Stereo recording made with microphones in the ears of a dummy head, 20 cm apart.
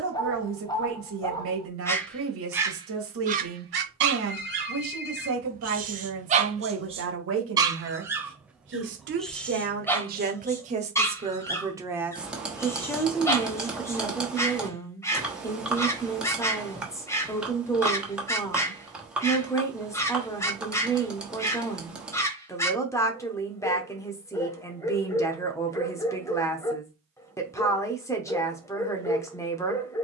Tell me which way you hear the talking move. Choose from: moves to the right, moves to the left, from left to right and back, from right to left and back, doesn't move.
moves to the left.